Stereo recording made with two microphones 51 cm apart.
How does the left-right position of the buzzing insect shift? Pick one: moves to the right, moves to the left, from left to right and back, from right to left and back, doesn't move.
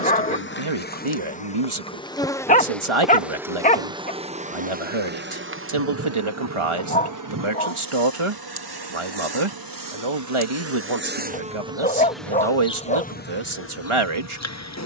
from left to right and back.